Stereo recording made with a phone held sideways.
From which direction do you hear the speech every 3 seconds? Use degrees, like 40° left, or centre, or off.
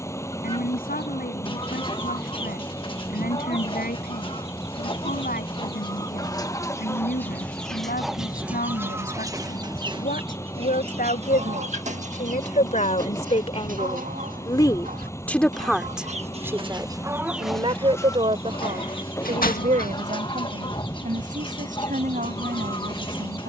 80° left, 80° left, 80° left, 70° left, 40° left, 20° right, 50° right, 60° right.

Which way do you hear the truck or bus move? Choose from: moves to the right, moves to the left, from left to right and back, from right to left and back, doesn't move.
doesn't move.